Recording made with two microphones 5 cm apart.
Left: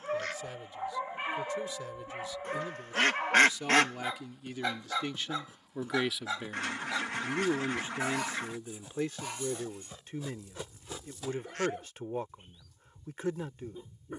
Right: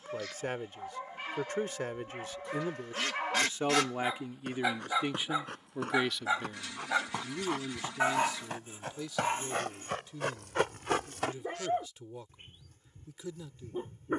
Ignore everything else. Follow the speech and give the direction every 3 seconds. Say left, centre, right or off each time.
right, right, left, left, left.